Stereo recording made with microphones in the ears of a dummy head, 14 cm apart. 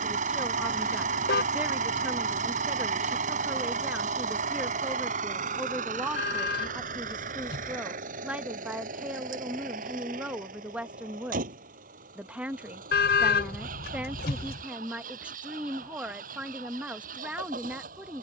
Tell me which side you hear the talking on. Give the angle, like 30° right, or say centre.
10° right.